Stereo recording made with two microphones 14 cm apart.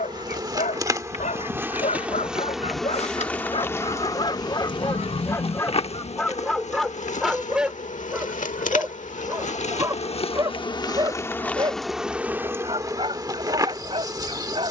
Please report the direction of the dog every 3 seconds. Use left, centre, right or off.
left, left, centre, right, right.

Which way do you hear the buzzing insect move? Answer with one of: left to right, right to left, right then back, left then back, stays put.
left then back.